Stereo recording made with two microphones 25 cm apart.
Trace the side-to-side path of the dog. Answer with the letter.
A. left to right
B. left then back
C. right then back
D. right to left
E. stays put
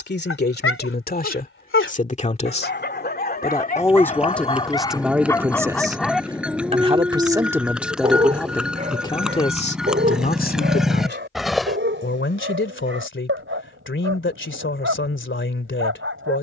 A.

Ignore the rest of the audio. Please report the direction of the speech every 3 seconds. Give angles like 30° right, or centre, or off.
30° left, centre, 10° right, 30° left, 50° left, 50° left.